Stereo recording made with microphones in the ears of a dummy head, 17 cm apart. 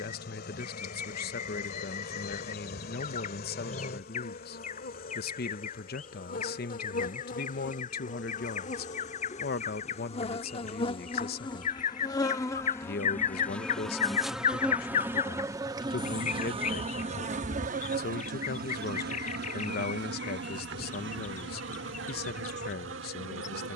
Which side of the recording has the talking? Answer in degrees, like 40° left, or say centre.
50° left.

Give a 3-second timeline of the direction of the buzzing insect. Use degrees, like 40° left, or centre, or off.
60° left, 50° left, 40° left, 30° left, 10° left, 30° right, 60° right, 70° right.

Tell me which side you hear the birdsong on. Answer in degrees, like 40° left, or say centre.
40° left.